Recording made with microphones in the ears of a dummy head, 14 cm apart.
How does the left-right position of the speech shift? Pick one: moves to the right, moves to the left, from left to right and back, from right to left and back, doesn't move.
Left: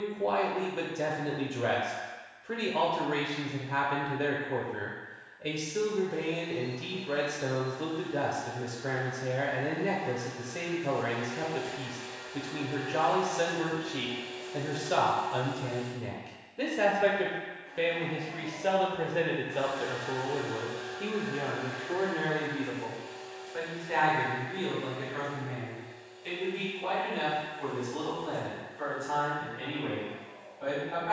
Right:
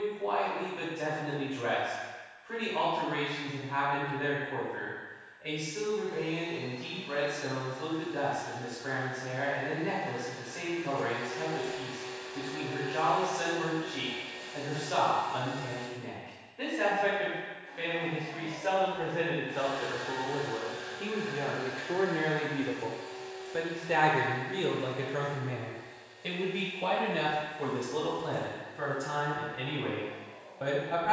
moves to the right.